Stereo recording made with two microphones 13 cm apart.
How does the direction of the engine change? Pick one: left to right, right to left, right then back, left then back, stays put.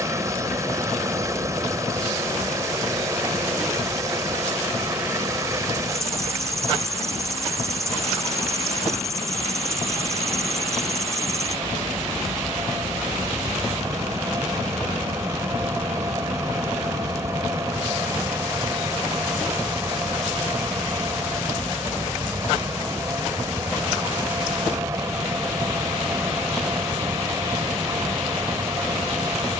stays put.